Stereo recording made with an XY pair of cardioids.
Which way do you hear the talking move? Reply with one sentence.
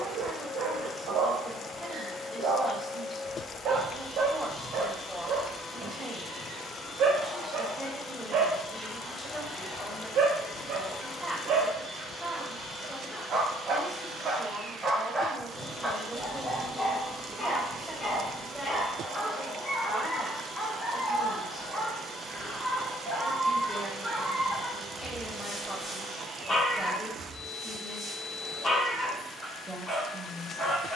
You can hear the talking stay in one place.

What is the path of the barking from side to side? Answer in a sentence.
You can hear the barking move to the left.